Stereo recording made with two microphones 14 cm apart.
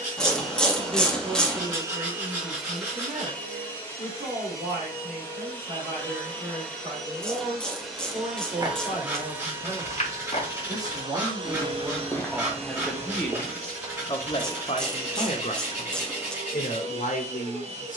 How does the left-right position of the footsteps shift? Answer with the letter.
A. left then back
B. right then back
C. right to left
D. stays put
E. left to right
A.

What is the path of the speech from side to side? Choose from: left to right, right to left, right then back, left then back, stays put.
right to left.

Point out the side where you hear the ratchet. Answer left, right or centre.
centre.